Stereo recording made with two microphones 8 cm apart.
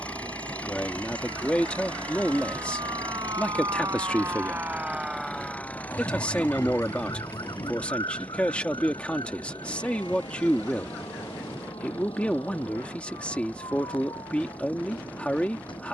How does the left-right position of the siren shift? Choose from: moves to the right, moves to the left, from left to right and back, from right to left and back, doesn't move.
moves to the left.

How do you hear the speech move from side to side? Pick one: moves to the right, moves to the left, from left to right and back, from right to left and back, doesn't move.
doesn't move.